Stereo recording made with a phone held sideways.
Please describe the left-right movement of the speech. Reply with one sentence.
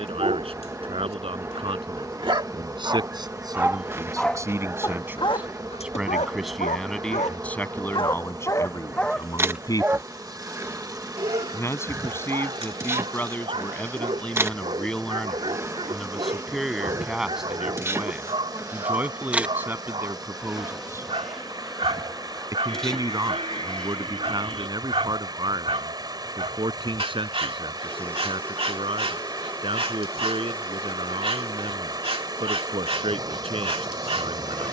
In this clip you hear the speech move from right to left and back again.